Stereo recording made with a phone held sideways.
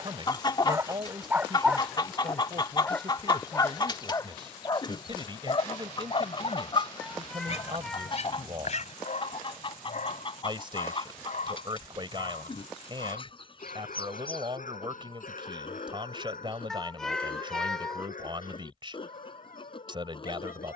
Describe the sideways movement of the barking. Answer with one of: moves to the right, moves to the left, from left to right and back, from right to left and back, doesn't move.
moves to the left.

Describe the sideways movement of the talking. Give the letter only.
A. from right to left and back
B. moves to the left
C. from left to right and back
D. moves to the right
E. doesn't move
E.